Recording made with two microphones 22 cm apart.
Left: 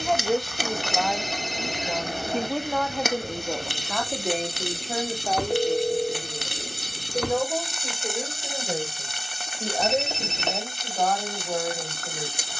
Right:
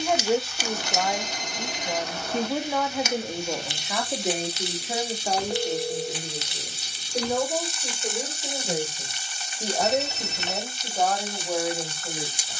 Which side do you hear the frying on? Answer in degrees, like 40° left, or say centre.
60° left.